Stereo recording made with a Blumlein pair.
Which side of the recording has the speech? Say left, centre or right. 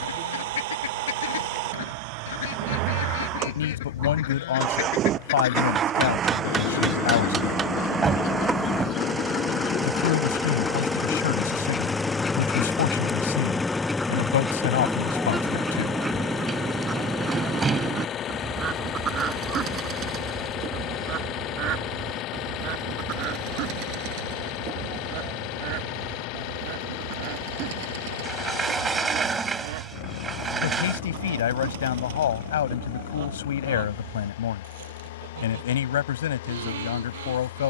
left.